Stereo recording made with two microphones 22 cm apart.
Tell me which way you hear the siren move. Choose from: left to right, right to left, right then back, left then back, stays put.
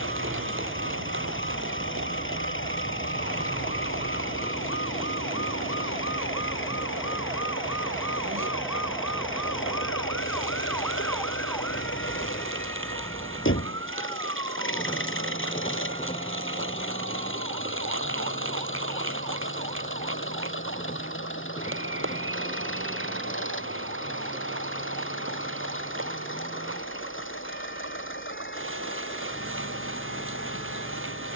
right to left.